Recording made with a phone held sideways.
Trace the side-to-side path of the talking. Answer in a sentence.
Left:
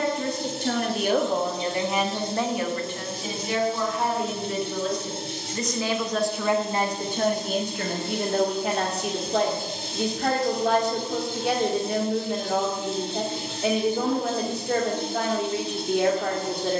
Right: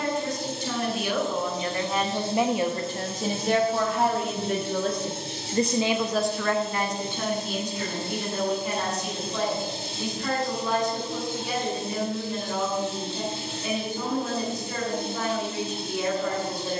You can hear the talking move from left to right and back again.